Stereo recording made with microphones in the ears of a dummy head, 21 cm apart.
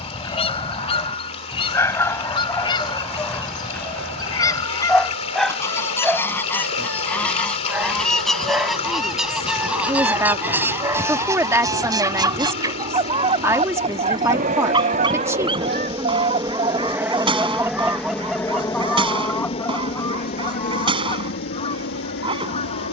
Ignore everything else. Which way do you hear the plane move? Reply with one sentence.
In this clip you hear the plane move from right to left.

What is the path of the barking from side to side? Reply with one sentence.
In this clip you hear the barking move to the right.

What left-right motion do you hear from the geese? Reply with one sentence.
In this clip you hear the geese move from left to right and back again.